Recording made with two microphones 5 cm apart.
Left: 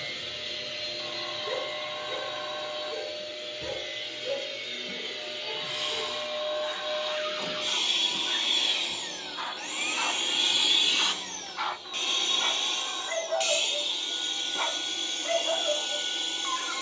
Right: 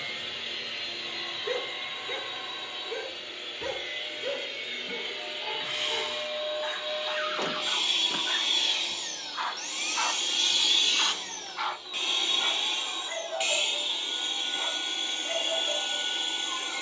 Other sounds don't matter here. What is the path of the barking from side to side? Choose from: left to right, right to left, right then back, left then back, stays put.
right to left.